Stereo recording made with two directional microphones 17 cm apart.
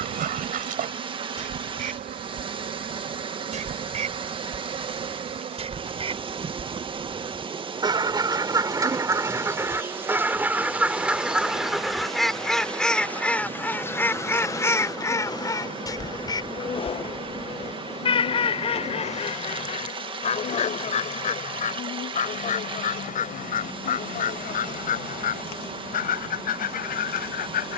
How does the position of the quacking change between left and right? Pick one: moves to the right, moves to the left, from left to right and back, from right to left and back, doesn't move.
moves to the left.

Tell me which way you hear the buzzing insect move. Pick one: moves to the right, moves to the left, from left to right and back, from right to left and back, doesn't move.
moves to the left.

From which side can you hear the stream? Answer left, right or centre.
right.